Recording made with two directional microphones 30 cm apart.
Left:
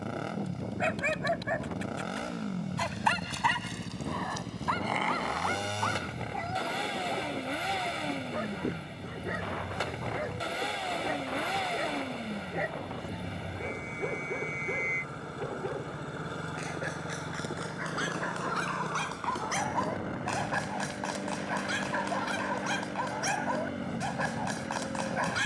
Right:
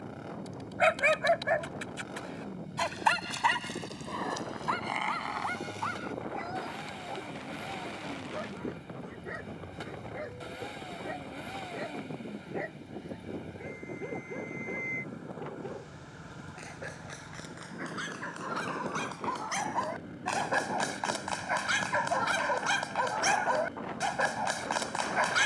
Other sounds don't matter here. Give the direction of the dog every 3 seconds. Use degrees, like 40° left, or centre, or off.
20° right, 10° left, 20° left, 30° left, 40° left, 40° left, 10° left, 30° right, 30° right.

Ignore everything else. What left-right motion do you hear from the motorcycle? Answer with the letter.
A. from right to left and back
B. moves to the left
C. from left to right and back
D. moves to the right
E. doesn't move
E.